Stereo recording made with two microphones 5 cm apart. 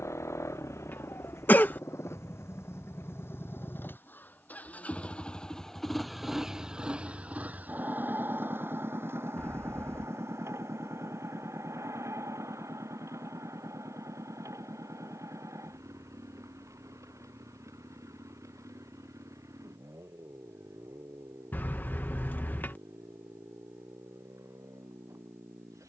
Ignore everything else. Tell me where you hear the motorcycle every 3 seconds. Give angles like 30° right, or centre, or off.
70° left, 30° left, 30° right, 60° right, 70° right, 70° right, 70° right, 80° right, 80° right.